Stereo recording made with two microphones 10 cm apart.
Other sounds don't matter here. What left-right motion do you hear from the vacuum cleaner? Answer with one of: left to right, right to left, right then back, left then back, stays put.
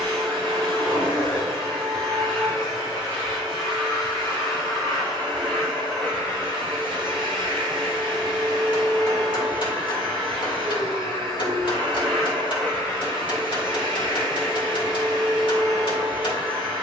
stays put.